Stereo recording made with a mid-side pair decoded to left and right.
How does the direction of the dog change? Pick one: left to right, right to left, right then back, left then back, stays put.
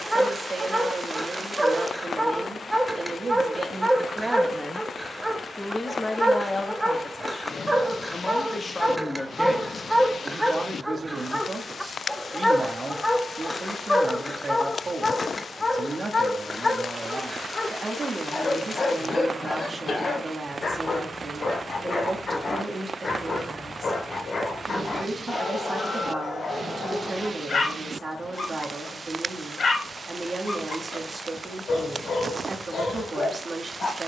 right to left.